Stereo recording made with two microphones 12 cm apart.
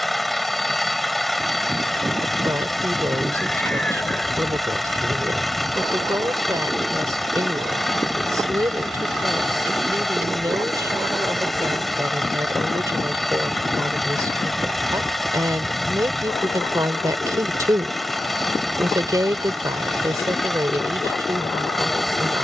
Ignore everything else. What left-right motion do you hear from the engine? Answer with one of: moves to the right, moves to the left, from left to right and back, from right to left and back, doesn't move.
doesn't move.